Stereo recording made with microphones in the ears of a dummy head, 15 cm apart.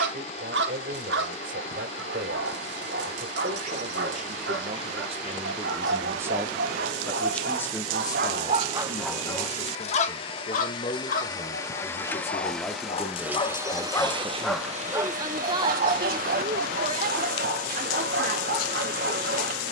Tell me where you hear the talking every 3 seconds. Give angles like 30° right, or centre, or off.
60° right, 40° right, 10° left, 30° left, centre, 30° right, 50° right.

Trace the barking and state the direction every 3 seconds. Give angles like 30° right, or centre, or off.
80° right, 80° right, 60° right, 40° left, 20° left, 60° right, 70° right.